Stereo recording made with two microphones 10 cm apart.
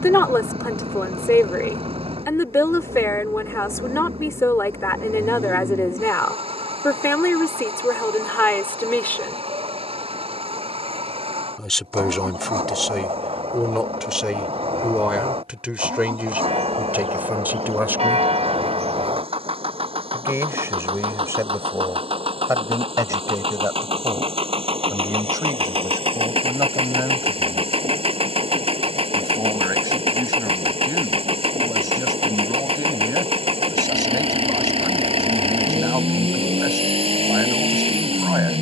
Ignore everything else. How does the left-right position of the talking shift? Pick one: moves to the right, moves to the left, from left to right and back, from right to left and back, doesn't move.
moves to the right.